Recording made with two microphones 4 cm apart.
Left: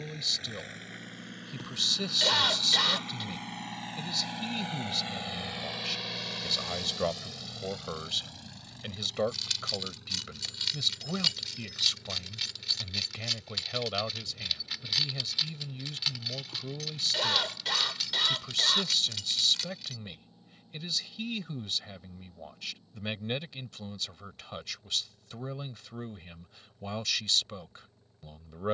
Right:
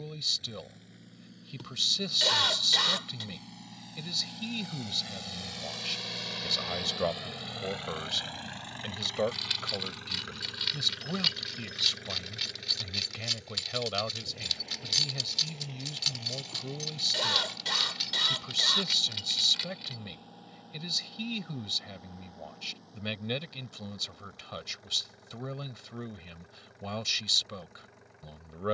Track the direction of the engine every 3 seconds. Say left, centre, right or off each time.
left, left, right, right, right, right, right, right, right, right.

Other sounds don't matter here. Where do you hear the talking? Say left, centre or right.
centre.